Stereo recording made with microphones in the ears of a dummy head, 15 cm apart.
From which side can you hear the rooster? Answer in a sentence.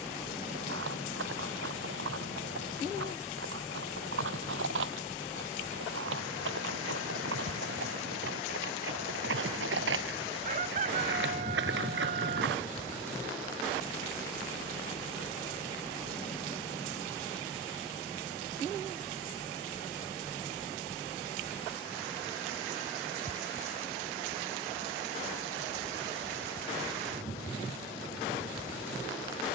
You can hear the rooster on the right.